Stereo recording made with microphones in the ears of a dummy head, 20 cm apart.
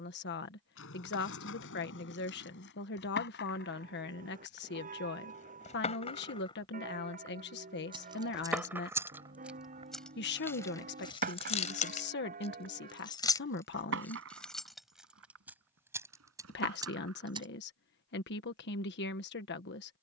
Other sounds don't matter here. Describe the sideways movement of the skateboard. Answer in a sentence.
You can hear the skateboard travel towards the right.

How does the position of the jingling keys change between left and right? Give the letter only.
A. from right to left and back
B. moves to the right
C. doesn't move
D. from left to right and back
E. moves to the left
A.